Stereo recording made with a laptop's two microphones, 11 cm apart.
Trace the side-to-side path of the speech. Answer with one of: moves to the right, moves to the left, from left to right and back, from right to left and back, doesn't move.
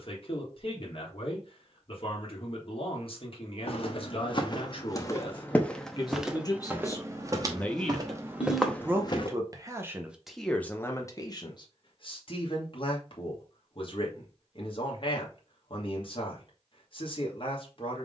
from left to right and back.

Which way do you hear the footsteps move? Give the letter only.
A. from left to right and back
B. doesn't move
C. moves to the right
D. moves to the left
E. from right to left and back
A.